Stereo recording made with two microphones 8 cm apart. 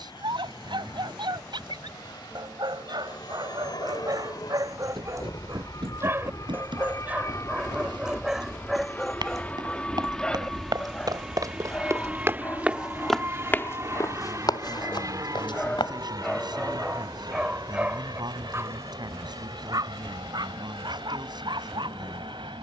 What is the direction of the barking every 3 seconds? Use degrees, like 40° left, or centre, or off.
70° right, 50° right, 20° right, 10° left, 30° left, centre, 50° right, 80° right.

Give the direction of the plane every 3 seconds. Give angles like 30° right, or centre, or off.
70° left, 60° left, 40° left, centre, 30° right, 50° right, 60° right, 60° right.